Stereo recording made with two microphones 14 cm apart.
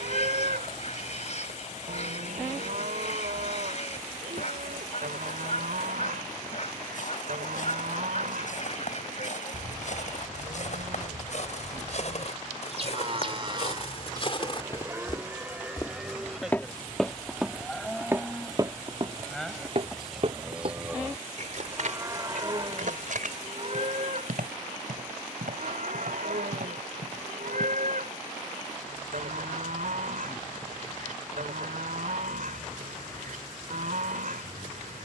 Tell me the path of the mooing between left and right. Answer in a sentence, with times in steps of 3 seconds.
You can hear the mooing on the right from 0 s, in the centre from 15 s and on the right from 21 s.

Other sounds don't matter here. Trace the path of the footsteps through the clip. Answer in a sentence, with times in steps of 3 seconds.
In this clip you hear the footsteps not at all from 0 s, on the left from 6 s, in the centre from 15 s, on the right from 18 s and not at all from 30 s.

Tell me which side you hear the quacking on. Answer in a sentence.
In this clip you hear the quacking on the left.